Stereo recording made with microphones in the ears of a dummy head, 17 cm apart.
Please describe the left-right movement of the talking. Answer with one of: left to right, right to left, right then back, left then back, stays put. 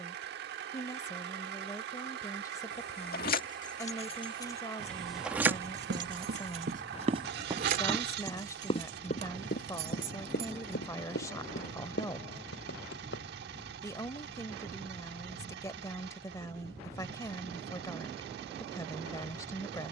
stays put.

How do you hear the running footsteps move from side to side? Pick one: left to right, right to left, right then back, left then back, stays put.
right to left.